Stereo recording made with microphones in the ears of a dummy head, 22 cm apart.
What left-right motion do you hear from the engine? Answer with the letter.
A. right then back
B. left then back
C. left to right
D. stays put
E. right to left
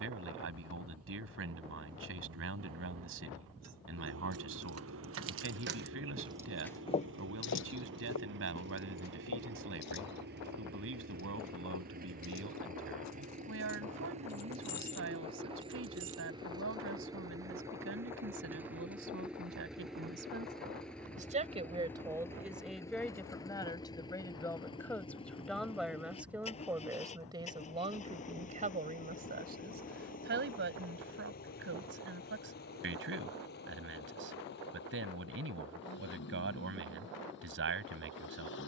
E.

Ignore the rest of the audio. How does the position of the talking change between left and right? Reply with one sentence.
In this clip you hear the talking go left and come back.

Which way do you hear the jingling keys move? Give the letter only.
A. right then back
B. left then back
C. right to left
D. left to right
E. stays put
B.